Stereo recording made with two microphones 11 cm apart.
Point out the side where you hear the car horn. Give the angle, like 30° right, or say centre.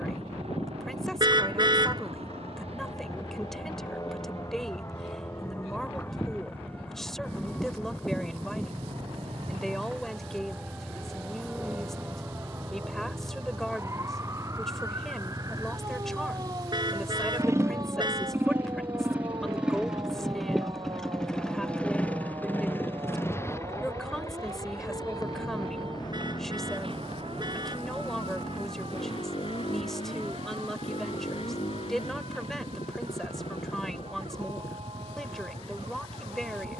40° right.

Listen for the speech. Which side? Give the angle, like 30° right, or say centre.
centre.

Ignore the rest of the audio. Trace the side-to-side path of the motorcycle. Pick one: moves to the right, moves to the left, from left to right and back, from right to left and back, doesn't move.
moves to the left.